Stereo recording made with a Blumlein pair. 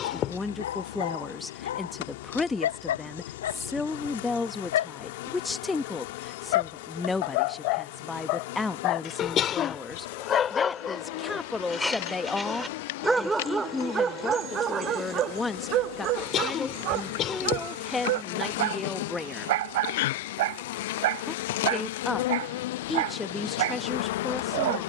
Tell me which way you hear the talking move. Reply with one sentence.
You can hear the talking stay put.